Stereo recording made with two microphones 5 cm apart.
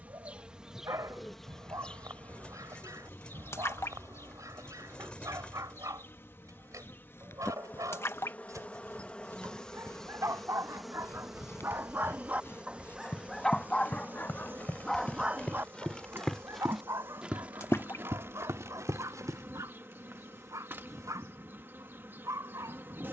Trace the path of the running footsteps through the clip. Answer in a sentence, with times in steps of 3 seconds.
You can hear the running footsteps not at all from 0 s, on the left from 6 s, in the centre from 15 s, on the right from 18 s and not at all from 21 s.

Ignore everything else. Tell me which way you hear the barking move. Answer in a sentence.
You can hear the barking go left and come back.